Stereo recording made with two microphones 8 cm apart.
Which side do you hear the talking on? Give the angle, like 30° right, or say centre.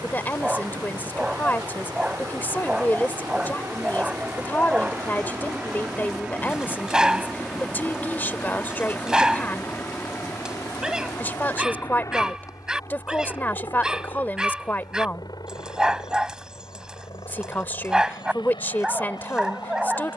20° left.